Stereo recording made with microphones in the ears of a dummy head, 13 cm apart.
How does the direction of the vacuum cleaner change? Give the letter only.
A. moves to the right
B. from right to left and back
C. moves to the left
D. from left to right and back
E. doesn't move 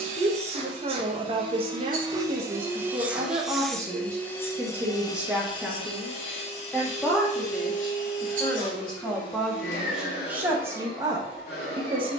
C.